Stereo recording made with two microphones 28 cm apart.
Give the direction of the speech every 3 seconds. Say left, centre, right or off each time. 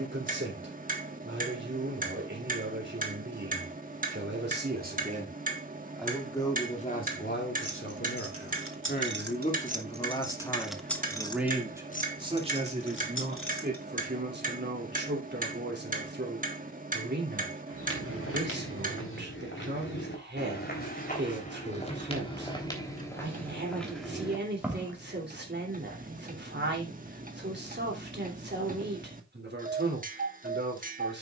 right, right, left, centre, right, right, right, right, right, right, right.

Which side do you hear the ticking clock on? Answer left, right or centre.
right.